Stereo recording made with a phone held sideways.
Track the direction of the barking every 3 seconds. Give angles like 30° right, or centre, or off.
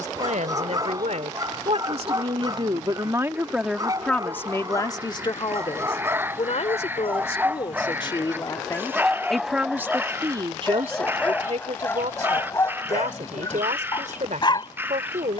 30° right, 20° right, 10° right, 10° left, 20° left.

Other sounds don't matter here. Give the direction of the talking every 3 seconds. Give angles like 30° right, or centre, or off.
50° right, 20° left, 40° left, 30° right, 60° right.